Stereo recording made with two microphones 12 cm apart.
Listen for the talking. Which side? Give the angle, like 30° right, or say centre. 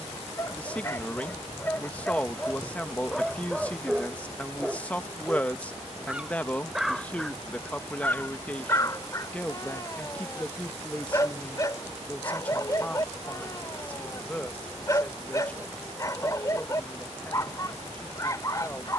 10° left.